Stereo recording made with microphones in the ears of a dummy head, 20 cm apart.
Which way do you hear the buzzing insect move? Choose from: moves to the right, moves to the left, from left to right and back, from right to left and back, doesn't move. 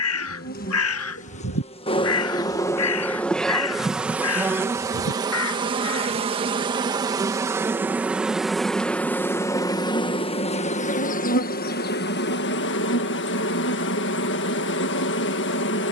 from left to right and back.